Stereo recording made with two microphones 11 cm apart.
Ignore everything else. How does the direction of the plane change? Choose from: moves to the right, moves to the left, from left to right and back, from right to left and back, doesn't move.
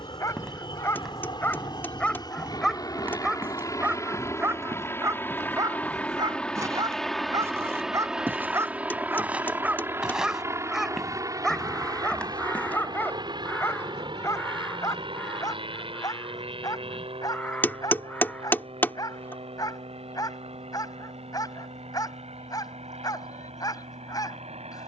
moves to the right.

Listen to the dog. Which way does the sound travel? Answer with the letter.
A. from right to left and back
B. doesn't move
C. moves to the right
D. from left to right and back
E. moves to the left
D.